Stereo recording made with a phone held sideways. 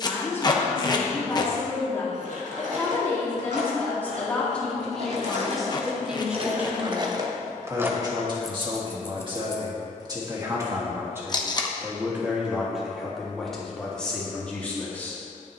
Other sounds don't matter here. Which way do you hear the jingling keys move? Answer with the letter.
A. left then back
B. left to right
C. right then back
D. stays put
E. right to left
E.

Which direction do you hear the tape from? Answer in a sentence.
In this clip you hear the tape on the left.